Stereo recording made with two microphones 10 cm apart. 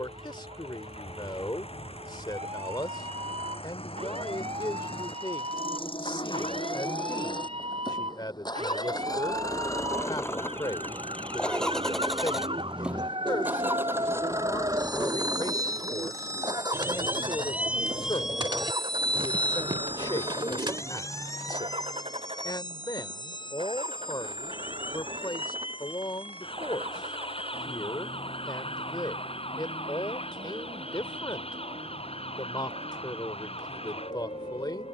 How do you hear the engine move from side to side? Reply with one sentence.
In this clip you hear the engine go from the left side to the right.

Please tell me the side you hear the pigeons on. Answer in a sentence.
You can hear the pigeons on the right.